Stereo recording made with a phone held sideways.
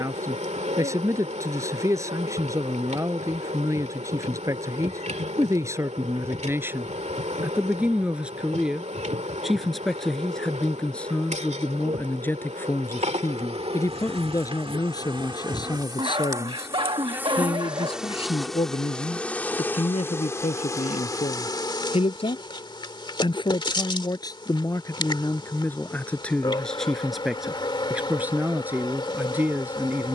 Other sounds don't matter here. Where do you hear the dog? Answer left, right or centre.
right.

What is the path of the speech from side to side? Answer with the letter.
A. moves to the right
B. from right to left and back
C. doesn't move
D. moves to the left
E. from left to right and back
B.